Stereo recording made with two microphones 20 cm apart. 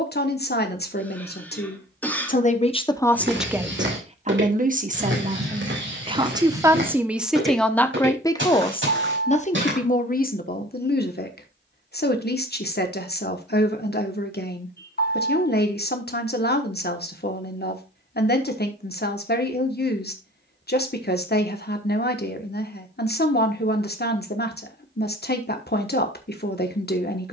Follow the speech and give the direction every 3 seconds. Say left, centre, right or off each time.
left, right, centre, left, left, left, left, left, left.